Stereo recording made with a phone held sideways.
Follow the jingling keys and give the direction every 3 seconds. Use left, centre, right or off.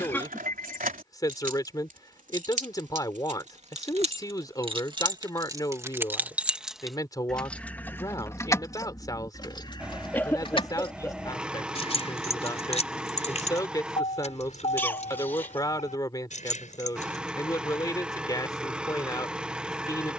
right, right, centre, left, left, left, off.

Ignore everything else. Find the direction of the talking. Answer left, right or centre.
left.